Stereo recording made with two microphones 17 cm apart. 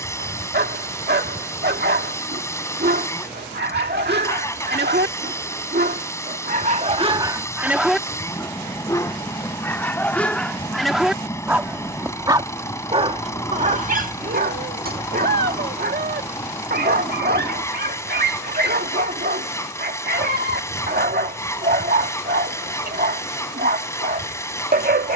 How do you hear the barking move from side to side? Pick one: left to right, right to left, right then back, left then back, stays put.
left then back.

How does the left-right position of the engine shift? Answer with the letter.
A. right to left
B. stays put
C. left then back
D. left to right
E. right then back
B.